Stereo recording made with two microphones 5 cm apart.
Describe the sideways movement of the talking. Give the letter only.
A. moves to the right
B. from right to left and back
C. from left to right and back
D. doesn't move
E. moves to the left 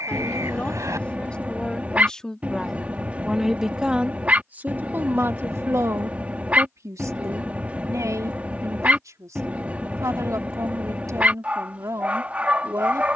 A.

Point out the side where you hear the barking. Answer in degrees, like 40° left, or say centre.
30° right.